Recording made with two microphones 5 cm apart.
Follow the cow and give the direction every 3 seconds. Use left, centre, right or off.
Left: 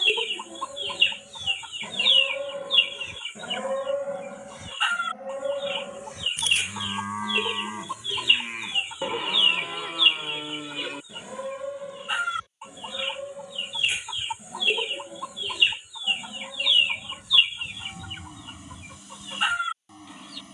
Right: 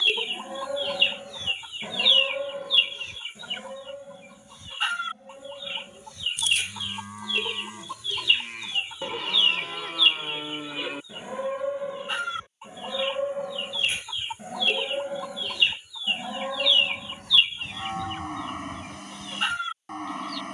right, left, left, centre, right, right, right.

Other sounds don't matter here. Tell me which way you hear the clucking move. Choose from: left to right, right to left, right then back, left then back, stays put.
stays put.